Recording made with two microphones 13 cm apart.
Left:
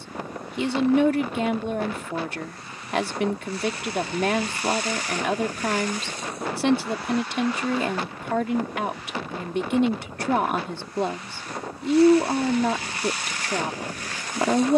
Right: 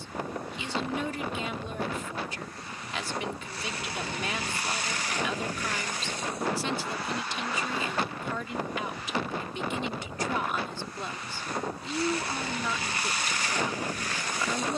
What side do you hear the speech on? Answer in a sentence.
In this clip you hear the speech on the left.